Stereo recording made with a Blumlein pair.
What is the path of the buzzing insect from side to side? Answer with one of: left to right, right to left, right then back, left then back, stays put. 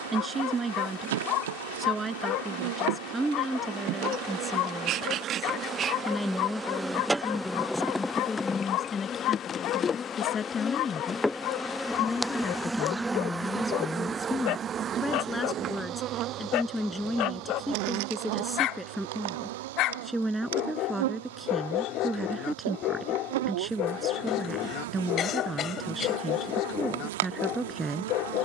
left then back.